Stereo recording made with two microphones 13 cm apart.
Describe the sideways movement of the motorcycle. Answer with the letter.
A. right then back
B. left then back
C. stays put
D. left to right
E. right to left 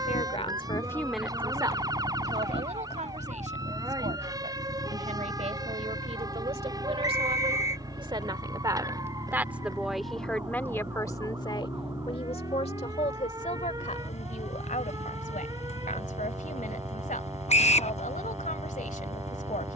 C.